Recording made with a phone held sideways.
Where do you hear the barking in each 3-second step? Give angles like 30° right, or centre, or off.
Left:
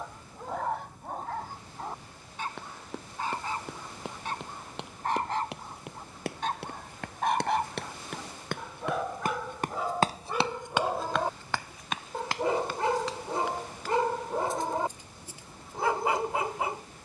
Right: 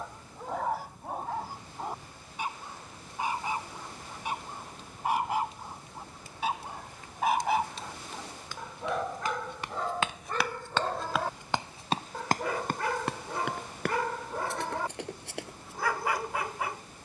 10° right, 10° right, centre, 10° left, 20° left, 20° left.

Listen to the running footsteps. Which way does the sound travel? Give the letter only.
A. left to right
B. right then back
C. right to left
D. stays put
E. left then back
A.